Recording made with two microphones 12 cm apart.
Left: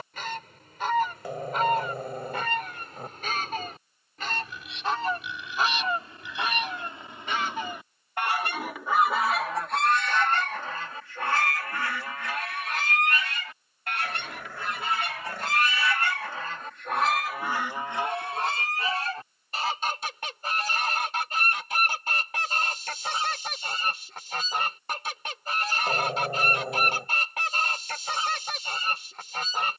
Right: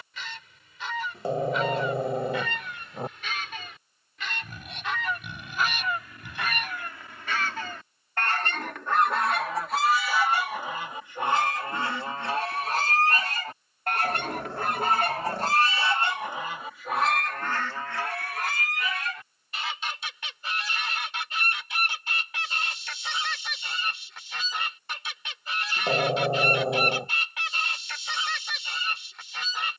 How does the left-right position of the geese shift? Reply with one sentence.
You can hear the geese go right and come back.